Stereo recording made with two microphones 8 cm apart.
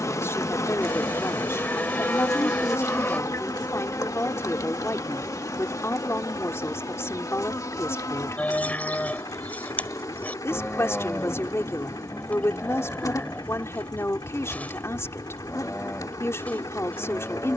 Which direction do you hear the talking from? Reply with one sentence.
You can hear the talking on the left.